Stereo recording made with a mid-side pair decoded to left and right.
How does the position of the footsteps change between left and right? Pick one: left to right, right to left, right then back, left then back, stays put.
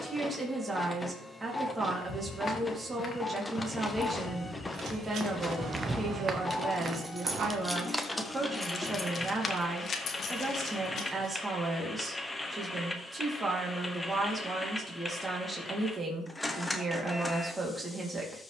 left to right.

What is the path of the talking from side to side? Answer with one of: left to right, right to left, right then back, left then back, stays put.
stays put.